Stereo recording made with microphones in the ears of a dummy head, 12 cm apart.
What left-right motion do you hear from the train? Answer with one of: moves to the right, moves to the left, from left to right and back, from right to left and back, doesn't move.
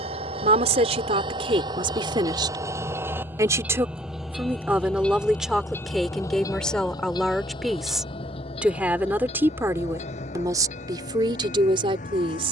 moves to the left.